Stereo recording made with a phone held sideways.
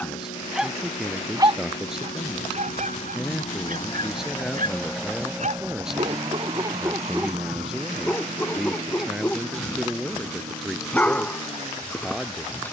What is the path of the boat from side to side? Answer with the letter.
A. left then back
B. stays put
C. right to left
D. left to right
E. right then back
D.